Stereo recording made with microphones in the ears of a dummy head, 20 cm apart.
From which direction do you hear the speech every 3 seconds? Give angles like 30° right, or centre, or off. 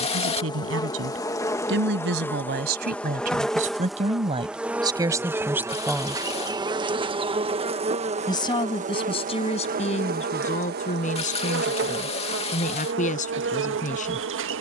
60° right, 20° right, 20° left, 30° left, 30° left.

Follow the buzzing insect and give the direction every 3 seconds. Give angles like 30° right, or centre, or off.
10° left, centre, 30° right, 50° right, 60° right.